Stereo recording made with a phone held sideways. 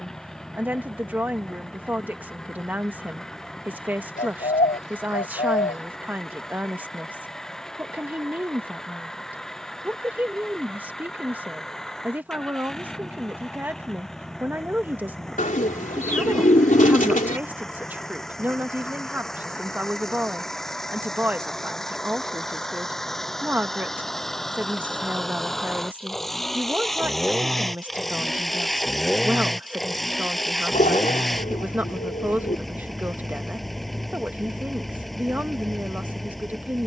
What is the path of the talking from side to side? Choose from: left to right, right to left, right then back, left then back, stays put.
stays put.